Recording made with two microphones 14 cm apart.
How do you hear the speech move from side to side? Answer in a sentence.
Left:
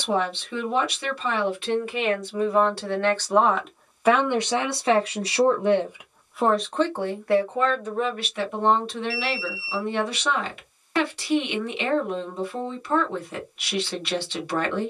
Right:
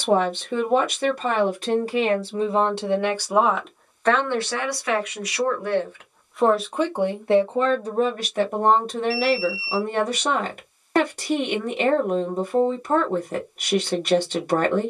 You can hear the speech go left and come back.